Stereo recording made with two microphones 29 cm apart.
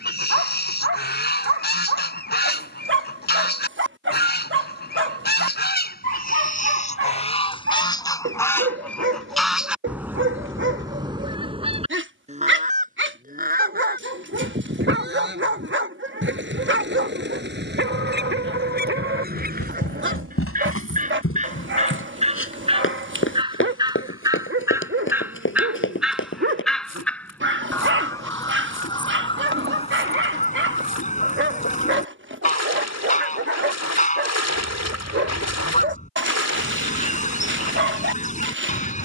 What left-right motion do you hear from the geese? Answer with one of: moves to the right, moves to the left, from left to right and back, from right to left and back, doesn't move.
from left to right and back.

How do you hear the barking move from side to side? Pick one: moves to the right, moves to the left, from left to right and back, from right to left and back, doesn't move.
doesn't move.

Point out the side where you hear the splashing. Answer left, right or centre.
left.